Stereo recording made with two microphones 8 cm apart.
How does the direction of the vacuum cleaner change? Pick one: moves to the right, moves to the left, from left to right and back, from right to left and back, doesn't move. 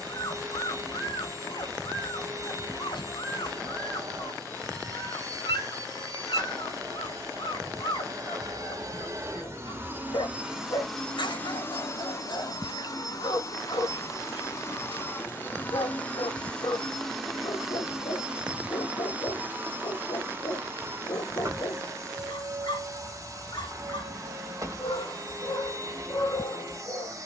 from right to left and back.